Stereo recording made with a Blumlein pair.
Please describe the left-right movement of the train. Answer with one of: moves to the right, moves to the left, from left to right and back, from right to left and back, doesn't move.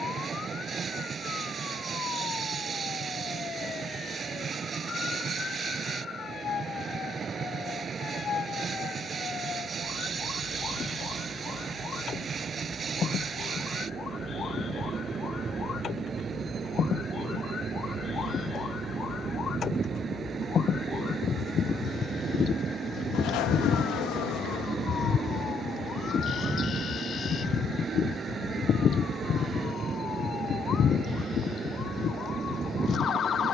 doesn't move.